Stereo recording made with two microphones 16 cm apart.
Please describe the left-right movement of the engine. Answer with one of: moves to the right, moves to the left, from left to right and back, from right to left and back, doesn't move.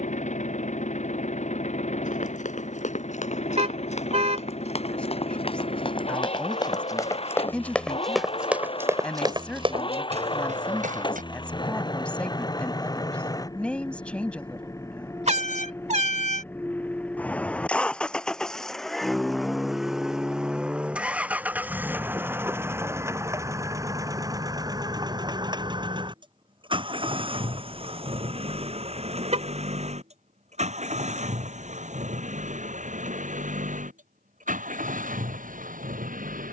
moves to the right.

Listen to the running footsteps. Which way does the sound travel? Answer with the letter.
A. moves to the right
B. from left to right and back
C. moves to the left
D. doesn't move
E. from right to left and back
A.